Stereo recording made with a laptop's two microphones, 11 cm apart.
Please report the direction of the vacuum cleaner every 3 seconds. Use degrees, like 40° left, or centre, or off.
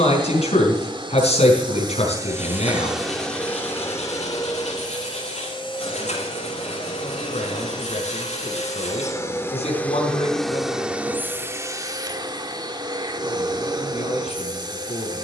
30° right, 30° left, 40° left, centre, 40° right.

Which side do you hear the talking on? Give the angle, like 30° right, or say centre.
70° left.